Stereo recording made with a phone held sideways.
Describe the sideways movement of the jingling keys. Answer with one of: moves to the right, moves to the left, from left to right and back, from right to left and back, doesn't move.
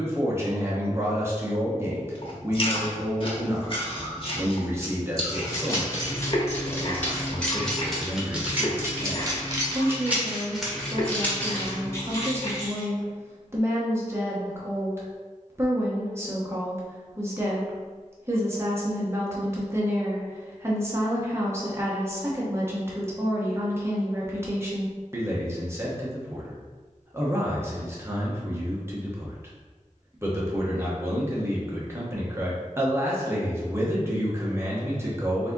from left to right and back.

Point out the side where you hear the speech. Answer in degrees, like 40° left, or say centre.
20° right.